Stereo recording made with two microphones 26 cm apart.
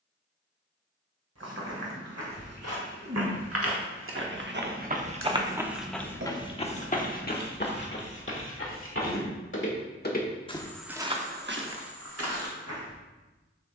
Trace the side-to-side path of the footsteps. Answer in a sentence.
In this clip you hear the footsteps go left and come back.